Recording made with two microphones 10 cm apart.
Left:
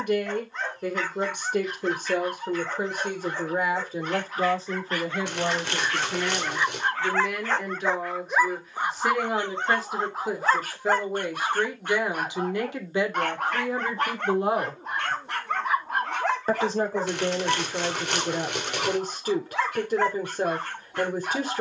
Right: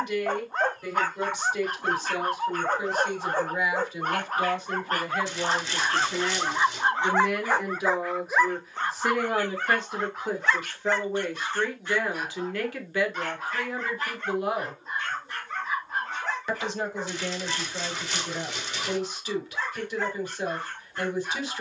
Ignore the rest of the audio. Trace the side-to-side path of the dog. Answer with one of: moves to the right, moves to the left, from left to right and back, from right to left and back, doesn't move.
moves to the left.